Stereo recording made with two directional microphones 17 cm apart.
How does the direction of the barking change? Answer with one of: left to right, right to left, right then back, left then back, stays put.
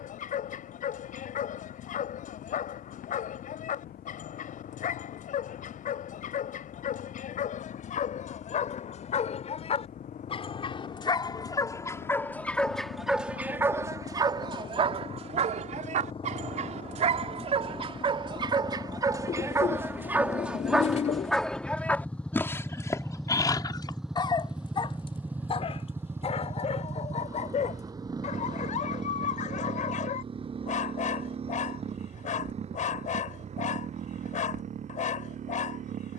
right then back.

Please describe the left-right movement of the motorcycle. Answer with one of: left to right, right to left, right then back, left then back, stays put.
left to right.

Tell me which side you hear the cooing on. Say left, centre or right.
left.